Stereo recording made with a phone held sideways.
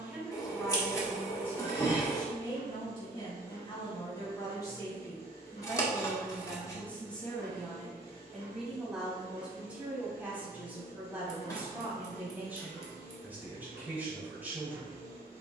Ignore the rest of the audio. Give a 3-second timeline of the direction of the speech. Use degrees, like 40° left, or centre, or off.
10° left, 20° left, 10° left, 10° right, 10° right.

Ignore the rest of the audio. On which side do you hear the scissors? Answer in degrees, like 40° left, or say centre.
20° left.